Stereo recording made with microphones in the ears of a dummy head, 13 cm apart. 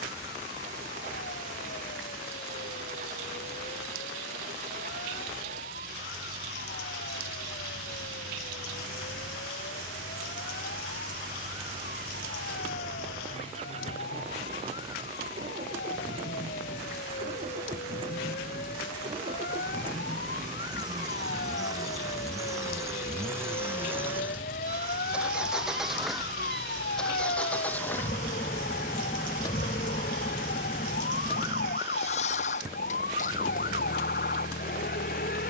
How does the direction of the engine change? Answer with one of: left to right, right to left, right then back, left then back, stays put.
right to left.